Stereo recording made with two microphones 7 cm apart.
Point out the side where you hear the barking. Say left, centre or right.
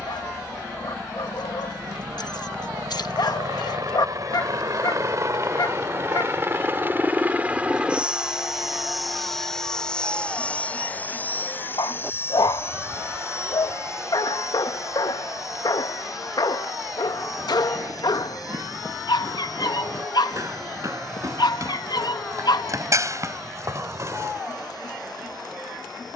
left.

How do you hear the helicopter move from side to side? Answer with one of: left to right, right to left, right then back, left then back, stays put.
right to left.